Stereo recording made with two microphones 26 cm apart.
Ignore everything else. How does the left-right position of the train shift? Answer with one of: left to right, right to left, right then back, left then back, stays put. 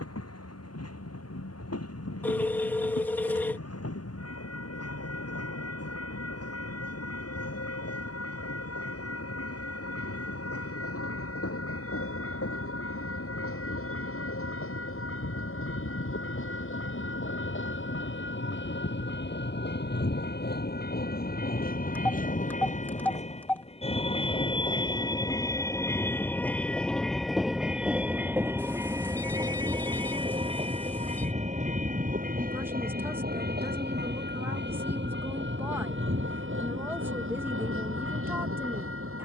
left to right.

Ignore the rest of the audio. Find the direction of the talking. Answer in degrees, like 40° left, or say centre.
10° right.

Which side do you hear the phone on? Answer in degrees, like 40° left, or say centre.
10° left.